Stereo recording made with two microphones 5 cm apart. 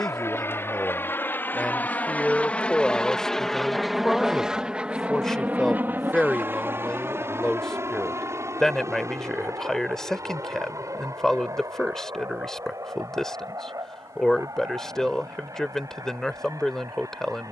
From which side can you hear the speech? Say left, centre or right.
centre.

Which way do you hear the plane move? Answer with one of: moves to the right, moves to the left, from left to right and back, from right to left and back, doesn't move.
moves to the right.